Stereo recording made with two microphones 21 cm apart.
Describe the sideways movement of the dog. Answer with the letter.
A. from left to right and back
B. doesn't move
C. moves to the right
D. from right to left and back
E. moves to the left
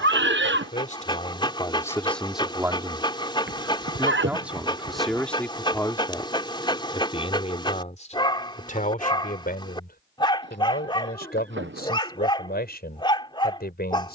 B.